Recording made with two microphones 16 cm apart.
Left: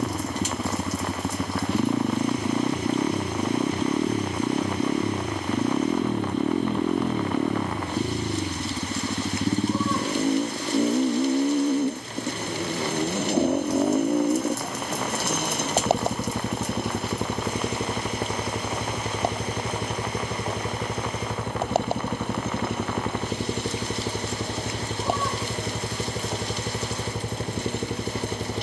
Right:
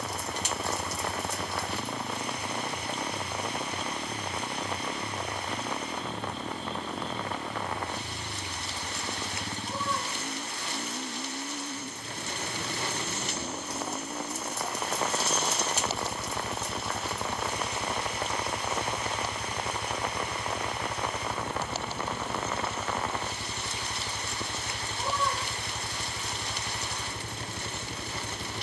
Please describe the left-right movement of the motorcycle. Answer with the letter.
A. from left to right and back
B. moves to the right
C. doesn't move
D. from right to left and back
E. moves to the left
C.